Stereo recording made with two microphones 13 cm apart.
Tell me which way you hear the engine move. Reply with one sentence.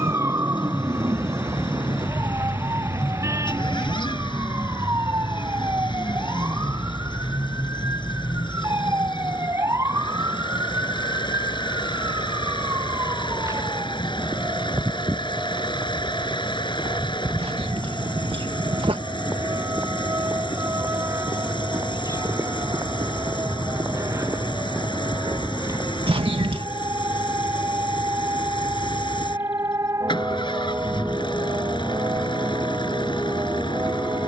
In this clip you hear the engine stay put.